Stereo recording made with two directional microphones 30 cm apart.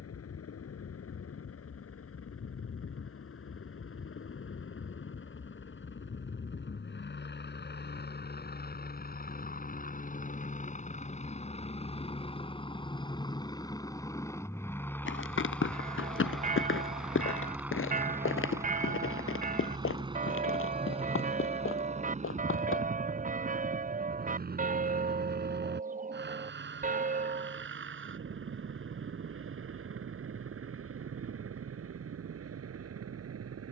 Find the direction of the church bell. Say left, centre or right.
right.